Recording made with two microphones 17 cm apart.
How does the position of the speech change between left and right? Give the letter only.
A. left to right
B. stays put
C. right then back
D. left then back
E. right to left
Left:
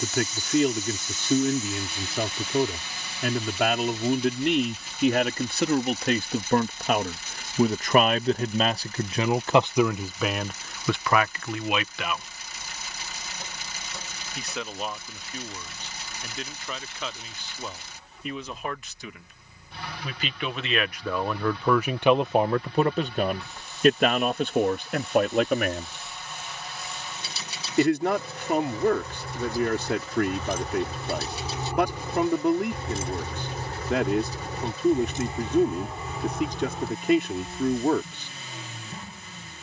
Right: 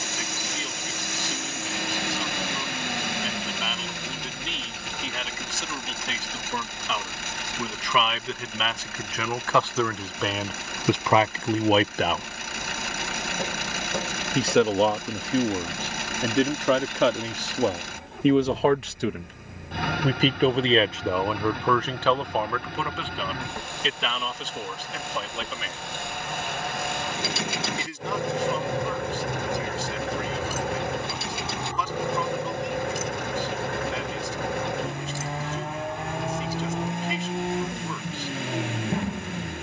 C.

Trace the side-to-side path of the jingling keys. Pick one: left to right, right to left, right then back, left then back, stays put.
left then back.